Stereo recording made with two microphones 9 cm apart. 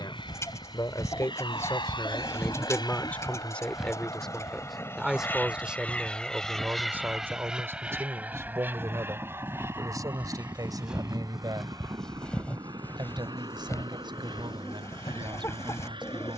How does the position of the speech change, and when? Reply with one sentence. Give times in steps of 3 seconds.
You can hear the speech on the left from 0 s, in the centre from 3 s and on the right from 6 s.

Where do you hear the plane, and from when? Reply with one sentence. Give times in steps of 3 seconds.
You can hear the plane on the left from 0 s, in the centre from 6 s and on the right from 9 s.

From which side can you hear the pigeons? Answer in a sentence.
In this clip you hear the pigeons on the left.